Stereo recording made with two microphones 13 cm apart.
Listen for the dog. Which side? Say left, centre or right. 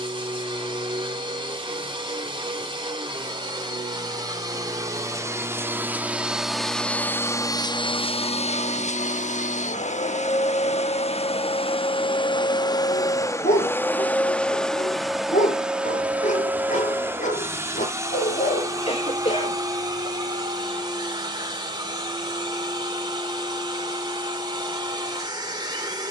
left.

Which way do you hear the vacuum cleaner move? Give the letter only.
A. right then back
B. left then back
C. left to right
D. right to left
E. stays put
B.